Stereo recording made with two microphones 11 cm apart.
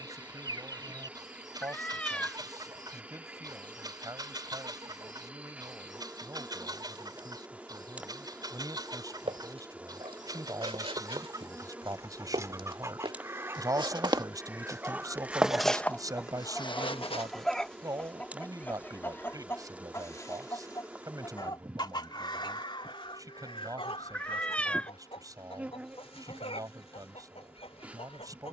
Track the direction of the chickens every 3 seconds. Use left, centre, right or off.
right, right, right, right, right, centre, left, left, left, left.